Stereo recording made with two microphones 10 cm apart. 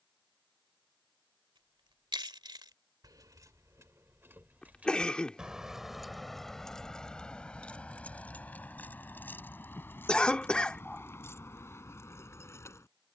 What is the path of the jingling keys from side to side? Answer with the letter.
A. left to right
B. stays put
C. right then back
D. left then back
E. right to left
E.